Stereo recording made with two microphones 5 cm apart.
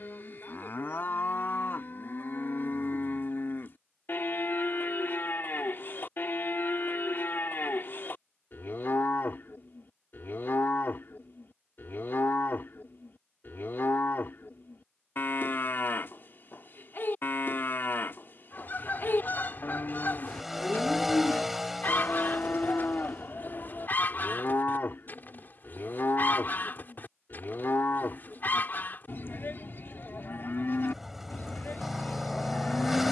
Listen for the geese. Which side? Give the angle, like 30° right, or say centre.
40° left.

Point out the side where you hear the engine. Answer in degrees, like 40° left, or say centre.
10° right.